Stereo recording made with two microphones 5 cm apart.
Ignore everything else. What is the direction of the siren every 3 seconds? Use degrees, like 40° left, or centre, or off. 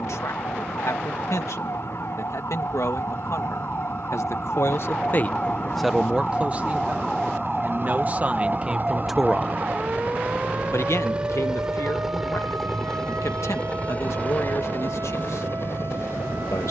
60° left, 40° left, centre, 30° right, 50° right, 60° right.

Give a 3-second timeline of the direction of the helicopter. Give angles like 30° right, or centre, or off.
70° right, 60° right, 50° right, 30° right, 20° left, 50° left.